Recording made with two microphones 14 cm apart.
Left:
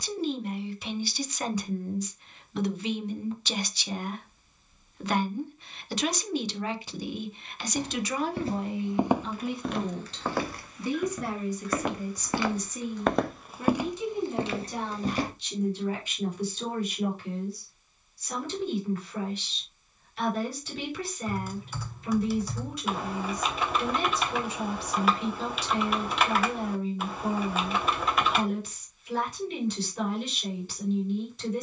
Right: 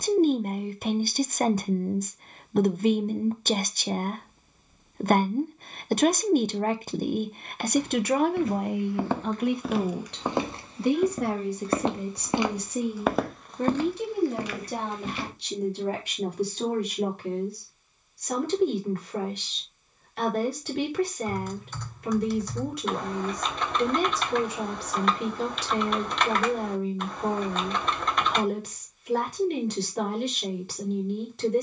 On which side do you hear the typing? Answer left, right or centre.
centre.